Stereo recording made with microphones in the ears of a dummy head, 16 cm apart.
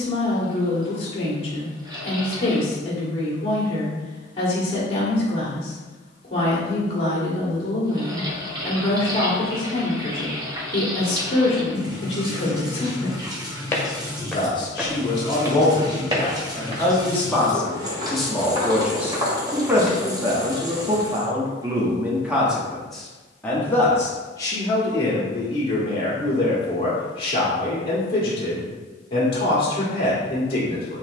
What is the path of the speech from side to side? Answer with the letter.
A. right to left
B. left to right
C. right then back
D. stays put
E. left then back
C.